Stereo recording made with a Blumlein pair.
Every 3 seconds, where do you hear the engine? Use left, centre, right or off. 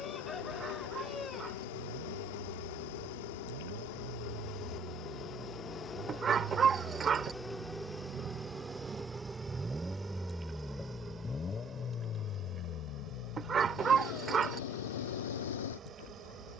right, right, right, centre, left, left.